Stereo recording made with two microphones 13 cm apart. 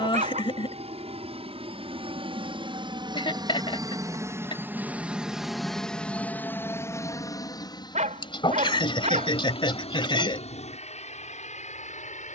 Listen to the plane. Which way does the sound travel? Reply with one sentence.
In this clip you hear the plane go from the right side to the left.